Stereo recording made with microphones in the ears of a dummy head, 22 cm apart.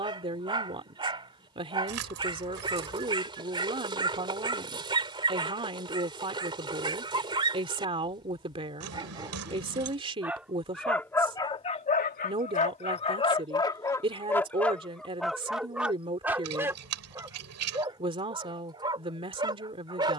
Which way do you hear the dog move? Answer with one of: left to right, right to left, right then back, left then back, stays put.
left then back.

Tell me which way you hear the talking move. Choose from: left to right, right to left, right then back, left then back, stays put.
stays put.